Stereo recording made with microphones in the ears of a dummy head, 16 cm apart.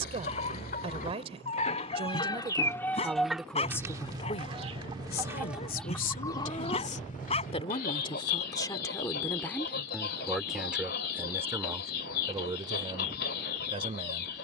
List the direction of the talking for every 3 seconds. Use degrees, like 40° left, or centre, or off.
30° right, 30° left, 30° left, centre, 30° right.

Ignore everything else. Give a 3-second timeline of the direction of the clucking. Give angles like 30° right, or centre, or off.
40° left, 10° right, 40° left, 60° left, 60° left.